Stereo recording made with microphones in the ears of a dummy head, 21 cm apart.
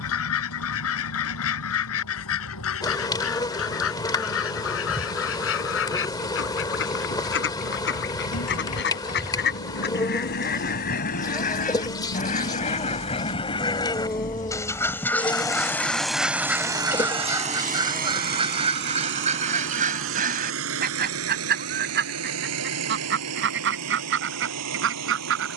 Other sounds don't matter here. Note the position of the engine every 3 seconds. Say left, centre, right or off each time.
left, left, left, left, left, centre, right, right, right.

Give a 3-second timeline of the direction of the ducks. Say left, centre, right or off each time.
left, left, left, left, left, centre, right, right, right.